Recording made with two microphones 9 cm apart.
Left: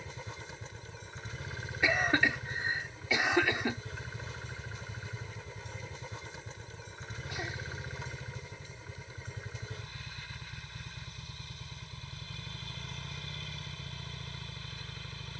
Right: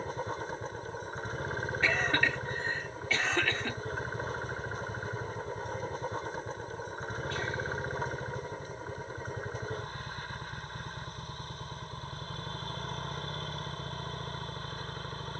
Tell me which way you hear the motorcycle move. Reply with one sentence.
You can hear the motorcycle stay put.